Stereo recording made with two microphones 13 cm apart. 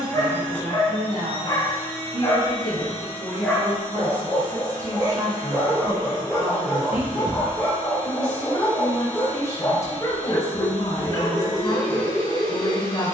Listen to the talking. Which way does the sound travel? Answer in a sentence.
In this clip you hear the talking move from right to left.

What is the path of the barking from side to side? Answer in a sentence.
In this clip you hear the barking go right and come back.